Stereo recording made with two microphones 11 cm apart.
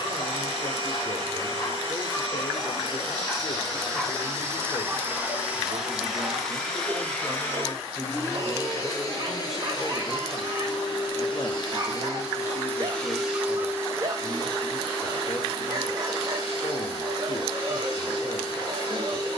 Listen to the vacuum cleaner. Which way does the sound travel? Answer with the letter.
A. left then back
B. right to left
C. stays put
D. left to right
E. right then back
A.